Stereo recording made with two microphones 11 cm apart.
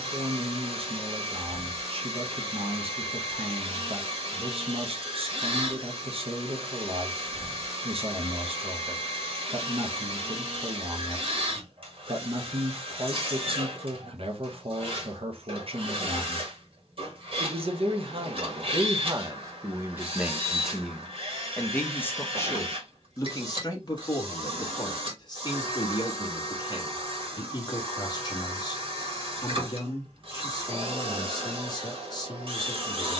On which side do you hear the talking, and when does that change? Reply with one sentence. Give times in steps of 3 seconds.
In this clip you hear the talking on the right from 0 s and on the left from 21 s.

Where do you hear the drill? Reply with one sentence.
You can hear the drill on the right.